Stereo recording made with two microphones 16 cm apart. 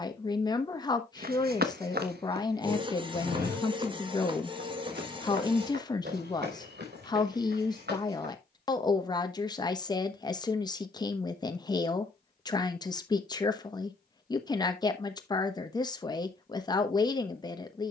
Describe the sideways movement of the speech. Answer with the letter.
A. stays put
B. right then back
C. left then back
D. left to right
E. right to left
A.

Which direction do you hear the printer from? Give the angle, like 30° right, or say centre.
30° right.